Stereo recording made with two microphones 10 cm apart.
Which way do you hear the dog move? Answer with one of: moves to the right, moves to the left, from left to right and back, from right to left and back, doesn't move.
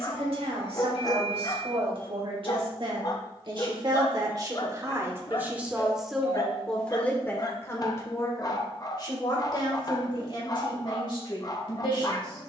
doesn't move.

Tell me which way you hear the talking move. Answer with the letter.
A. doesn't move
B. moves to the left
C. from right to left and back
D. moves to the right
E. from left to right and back
B.